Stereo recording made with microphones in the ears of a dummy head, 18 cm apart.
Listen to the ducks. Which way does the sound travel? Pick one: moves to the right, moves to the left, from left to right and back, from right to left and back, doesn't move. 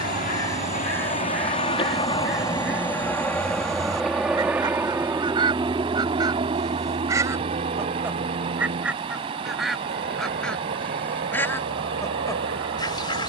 from left to right and back.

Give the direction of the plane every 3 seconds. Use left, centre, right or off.
left, centre, right, right, right.